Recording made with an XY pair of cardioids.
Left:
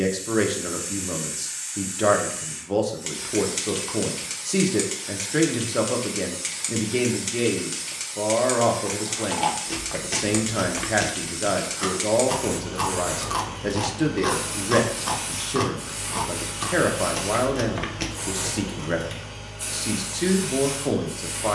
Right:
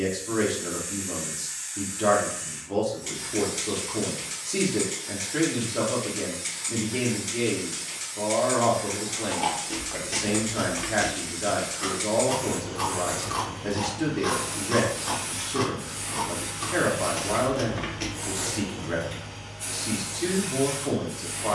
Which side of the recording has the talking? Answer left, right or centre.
left.